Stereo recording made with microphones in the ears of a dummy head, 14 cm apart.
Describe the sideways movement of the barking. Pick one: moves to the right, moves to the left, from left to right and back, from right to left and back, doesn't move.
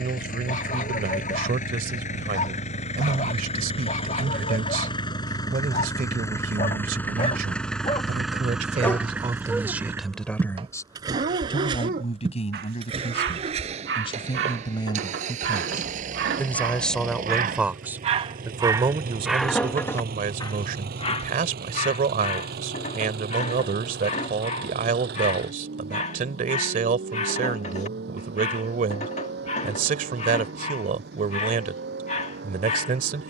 from left to right and back.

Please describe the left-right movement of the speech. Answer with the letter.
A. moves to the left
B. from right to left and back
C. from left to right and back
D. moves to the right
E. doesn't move
B.